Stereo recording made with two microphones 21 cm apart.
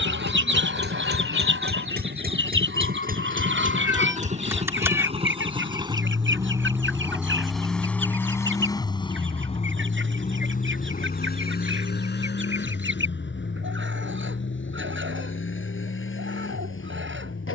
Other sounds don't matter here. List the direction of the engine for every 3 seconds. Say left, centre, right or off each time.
right, right, centre, left, left, left.